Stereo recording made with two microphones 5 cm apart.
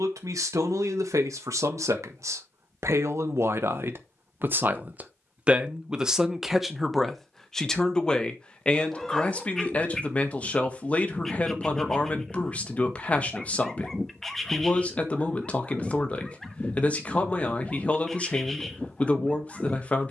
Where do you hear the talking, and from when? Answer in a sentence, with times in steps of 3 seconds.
You can hear the talking on the right from 0 s, in the centre from 6 s and on the left from 9 s.